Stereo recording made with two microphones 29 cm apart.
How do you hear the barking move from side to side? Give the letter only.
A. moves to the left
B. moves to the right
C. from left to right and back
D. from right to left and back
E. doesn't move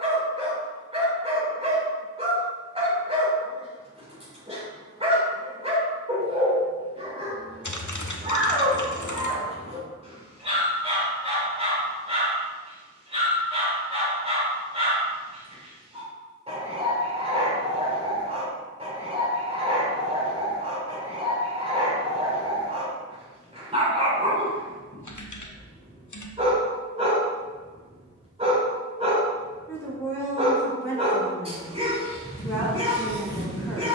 E.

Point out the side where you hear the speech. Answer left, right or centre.
centre.